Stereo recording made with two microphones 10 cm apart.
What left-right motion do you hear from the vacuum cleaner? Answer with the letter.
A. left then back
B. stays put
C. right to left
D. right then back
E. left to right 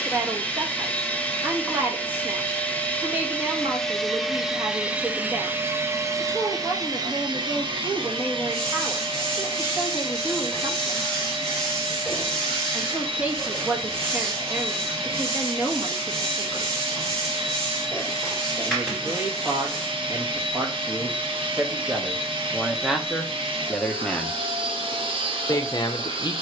E.